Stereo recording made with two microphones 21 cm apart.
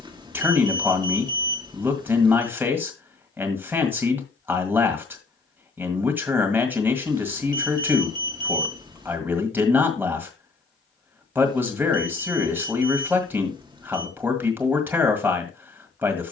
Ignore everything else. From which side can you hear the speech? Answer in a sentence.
In this clip you hear the speech in the centre.